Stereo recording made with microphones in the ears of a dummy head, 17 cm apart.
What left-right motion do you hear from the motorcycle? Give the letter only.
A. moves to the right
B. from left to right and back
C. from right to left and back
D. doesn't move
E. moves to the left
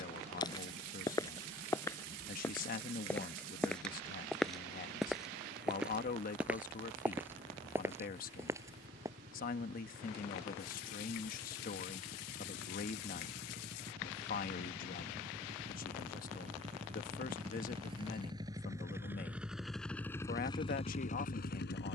E.